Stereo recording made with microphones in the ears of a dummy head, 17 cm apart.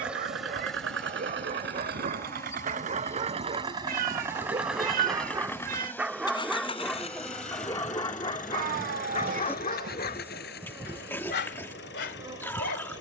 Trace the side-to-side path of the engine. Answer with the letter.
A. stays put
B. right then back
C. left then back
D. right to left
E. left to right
D.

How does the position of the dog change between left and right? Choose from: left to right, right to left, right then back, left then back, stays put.
right to left.